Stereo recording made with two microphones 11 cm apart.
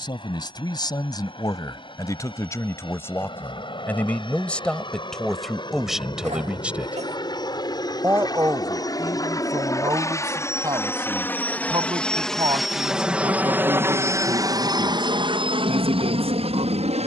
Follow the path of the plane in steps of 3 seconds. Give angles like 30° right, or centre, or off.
50° left, 50° left, 40° left, 20° left, 20° right, 50° right.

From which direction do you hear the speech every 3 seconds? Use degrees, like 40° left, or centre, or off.
30° left, 10° left, 20° right, 40° right, 50° right, 60° right.